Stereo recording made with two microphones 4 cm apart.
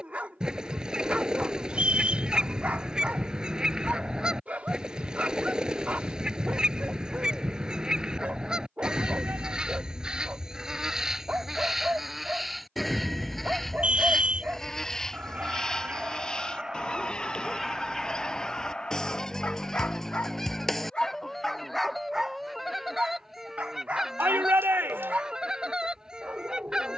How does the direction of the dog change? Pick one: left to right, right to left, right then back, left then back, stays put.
left then back.